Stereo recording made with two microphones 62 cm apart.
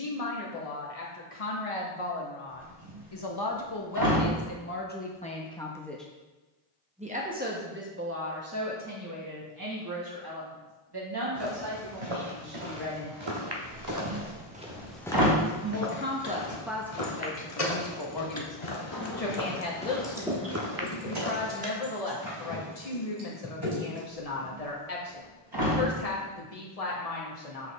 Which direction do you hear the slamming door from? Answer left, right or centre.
right.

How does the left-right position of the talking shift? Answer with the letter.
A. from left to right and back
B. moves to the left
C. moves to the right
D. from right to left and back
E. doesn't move
A.